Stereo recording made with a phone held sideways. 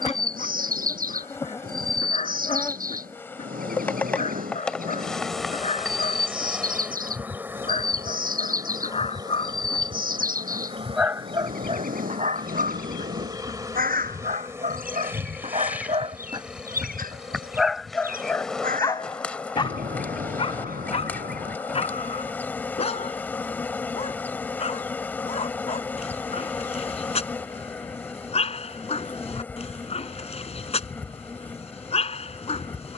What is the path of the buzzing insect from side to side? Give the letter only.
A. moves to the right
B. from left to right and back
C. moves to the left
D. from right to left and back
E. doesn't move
B.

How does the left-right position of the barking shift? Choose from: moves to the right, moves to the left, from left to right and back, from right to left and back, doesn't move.
from left to right and back.